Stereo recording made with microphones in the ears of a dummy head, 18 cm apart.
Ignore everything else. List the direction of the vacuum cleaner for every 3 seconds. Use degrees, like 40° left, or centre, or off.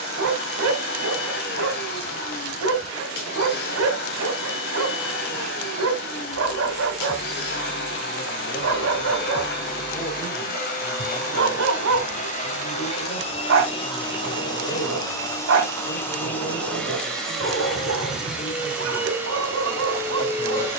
60° left, 60° left, 60° left, 50° left, 30° left, 10° left, 10° right.